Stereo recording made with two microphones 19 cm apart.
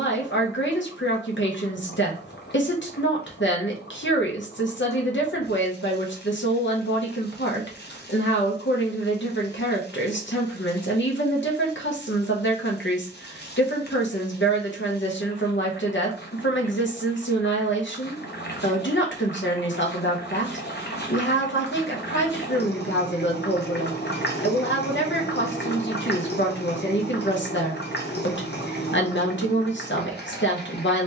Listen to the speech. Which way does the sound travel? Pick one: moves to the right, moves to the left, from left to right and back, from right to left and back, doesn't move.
doesn't move.